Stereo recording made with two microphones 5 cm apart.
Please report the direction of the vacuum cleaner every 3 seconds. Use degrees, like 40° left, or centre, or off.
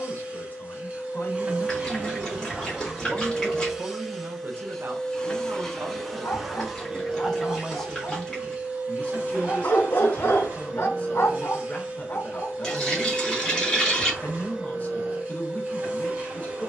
20° right, centre, 10° right, 30° right, 30° right, 30° right.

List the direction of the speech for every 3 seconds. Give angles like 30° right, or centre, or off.
20° left, 40° right, centre, 30° left, 30° left, 30° left.